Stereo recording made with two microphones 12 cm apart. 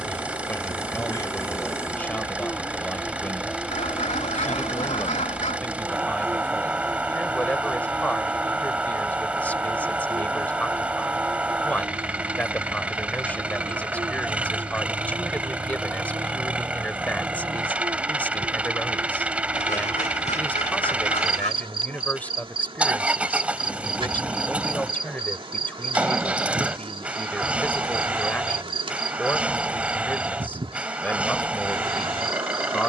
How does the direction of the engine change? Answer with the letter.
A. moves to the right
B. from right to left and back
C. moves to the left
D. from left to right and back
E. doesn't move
E.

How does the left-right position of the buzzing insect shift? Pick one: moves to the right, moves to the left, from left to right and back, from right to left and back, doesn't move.
moves to the right.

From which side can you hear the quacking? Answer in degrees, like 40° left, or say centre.
70° left.